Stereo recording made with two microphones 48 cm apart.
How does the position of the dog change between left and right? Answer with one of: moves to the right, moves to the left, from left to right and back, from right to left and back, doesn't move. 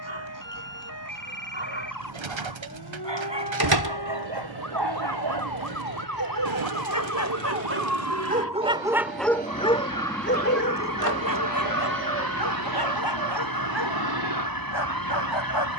moves to the left.